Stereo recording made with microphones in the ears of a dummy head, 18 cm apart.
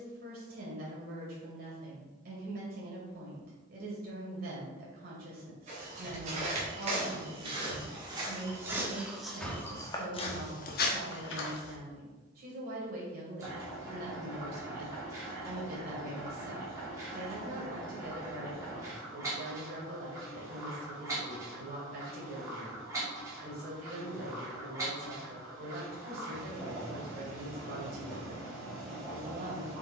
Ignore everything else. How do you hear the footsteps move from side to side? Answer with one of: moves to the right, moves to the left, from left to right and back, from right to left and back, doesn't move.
moves to the left.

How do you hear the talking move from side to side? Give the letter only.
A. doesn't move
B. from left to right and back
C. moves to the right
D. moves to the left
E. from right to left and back
A.